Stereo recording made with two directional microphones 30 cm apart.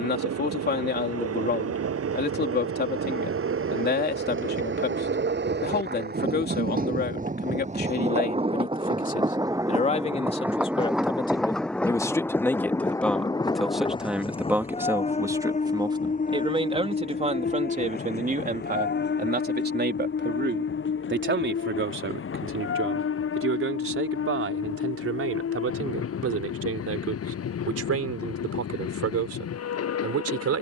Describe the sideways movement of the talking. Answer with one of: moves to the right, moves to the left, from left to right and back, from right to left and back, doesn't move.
moves to the right.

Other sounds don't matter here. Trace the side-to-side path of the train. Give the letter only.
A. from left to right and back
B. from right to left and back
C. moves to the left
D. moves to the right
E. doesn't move
C.